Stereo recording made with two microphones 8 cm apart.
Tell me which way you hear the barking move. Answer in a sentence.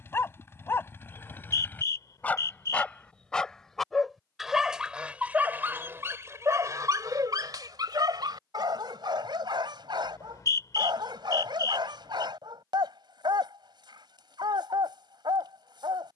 In this clip you hear the barking move from left to right.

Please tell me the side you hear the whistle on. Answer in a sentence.
In this clip you hear the whistle on the left.